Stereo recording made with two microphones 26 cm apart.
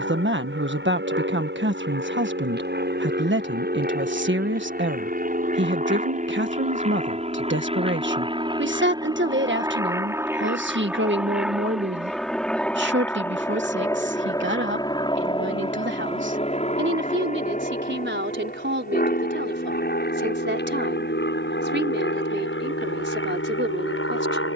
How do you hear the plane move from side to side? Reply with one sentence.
You can hear the plane go from the right side to the left.